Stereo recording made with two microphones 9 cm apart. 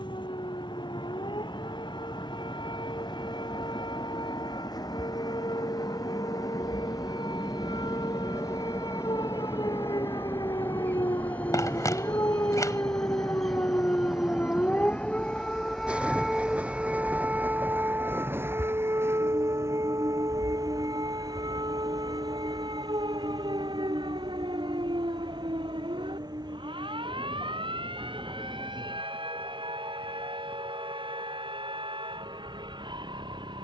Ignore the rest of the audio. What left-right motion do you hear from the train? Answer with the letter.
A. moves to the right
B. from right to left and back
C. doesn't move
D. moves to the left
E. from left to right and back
A.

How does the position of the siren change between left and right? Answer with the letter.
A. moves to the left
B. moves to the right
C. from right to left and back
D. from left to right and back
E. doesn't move
B.